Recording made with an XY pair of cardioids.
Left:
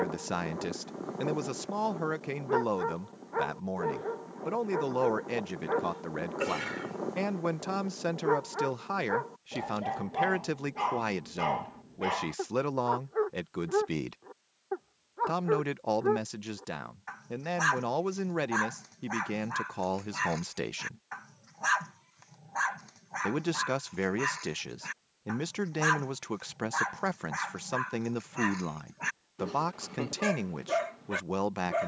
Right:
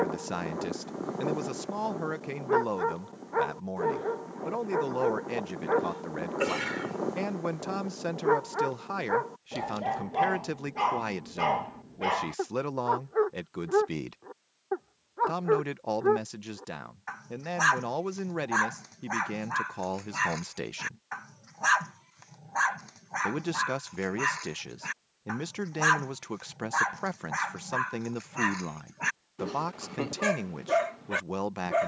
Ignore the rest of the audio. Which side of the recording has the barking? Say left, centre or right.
right.